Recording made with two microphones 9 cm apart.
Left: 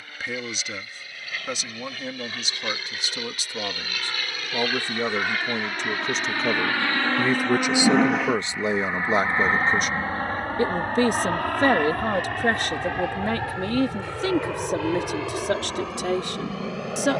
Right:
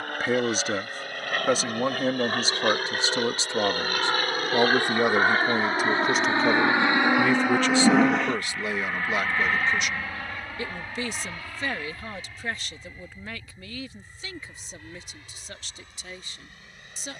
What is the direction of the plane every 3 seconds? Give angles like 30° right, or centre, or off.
60° right, 40° right, 10° right, 40° left, 60° left, 70° left.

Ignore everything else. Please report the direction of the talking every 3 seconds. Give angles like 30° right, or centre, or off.
40° right, 20° right, 10° left, 40° left, 60° left, 70° left.